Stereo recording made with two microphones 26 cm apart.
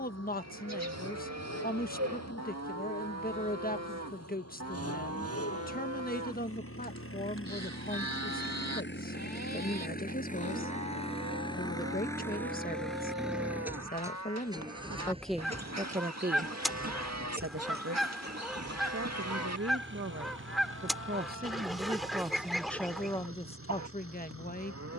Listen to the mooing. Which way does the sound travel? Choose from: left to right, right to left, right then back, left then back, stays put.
stays put.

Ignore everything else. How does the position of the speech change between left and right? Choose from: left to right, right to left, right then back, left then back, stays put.
right then back.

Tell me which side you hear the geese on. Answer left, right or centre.
centre.